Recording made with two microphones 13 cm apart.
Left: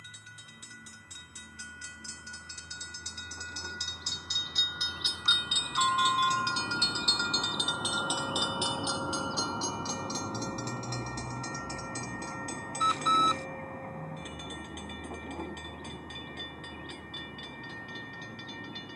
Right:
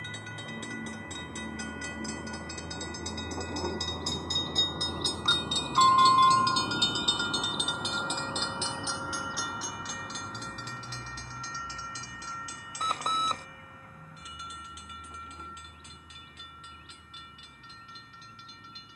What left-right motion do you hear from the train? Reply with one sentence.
In this clip you hear the train move to the left.